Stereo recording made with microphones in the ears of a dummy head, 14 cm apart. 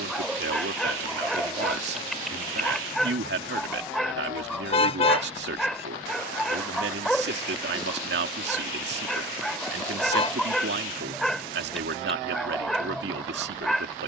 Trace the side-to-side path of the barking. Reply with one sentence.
In this clip you hear the barking stay put.